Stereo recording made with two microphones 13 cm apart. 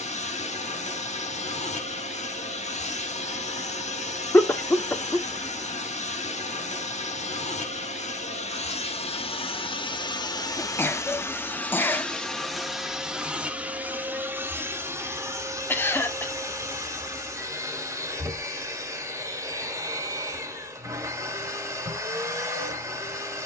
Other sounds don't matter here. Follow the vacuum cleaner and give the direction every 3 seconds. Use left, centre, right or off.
left, left, left, left, centre, right, right, right.